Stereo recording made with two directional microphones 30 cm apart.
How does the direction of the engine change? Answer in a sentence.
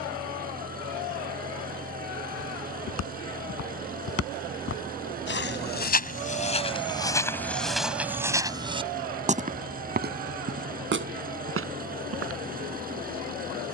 In this clip you hear the engine stay put.